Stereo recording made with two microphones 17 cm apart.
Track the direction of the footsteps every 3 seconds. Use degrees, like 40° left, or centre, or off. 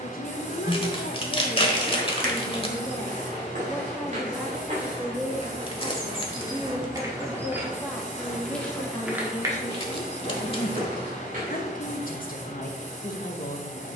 60° right, 50° right, 10° right, 40° right, off.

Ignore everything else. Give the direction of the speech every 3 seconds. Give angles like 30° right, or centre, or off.
40° left, centre, centre, 50° left, 50° left.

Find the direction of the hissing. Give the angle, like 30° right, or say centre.
40° left.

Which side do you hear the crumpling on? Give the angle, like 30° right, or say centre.
30° left.